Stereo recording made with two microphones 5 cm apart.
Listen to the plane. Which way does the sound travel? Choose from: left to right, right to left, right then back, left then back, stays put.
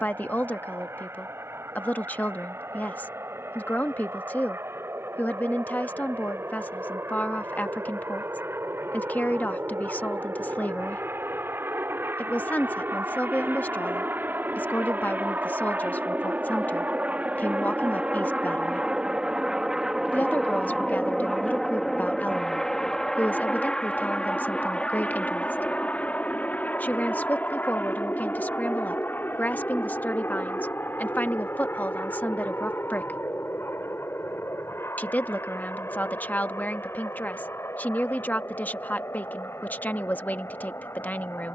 right to left.